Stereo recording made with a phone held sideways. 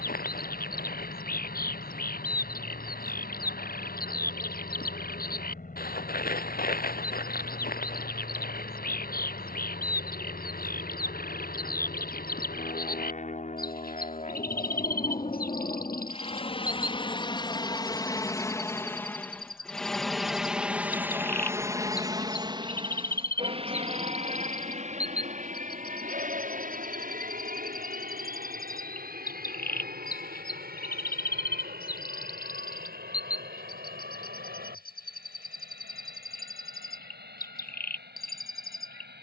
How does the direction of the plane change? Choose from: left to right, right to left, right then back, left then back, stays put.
left to right.